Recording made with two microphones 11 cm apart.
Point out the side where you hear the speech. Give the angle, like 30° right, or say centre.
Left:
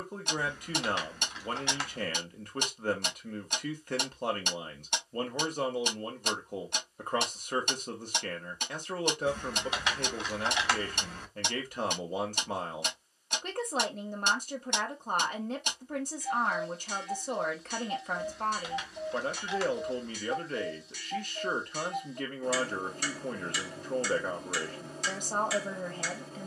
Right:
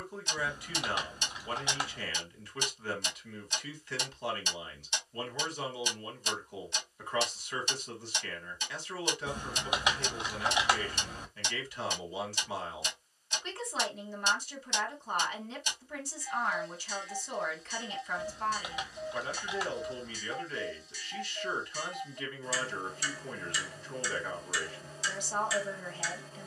50° left.